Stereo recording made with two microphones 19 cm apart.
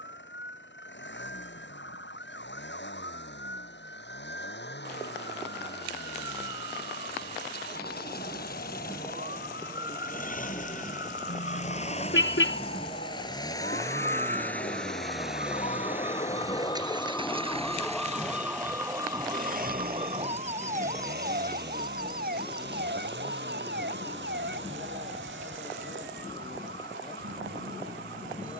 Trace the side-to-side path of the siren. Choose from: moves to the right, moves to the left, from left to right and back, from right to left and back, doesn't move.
moves to the right.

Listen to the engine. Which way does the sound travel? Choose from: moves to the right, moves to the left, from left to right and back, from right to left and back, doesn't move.
moves to the right.